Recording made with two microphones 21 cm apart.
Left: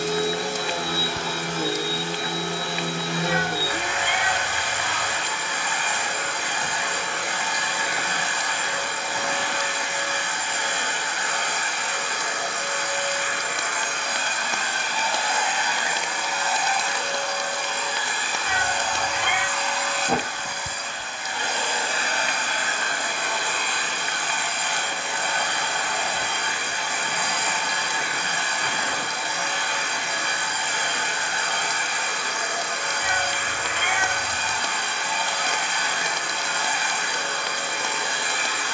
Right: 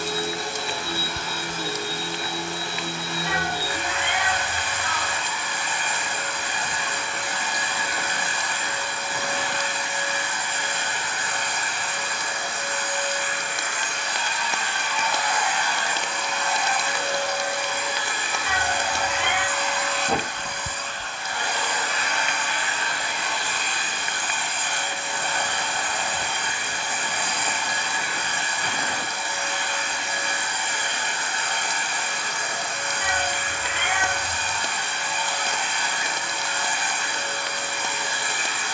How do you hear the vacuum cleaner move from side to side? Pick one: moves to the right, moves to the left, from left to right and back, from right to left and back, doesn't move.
from left to right and back.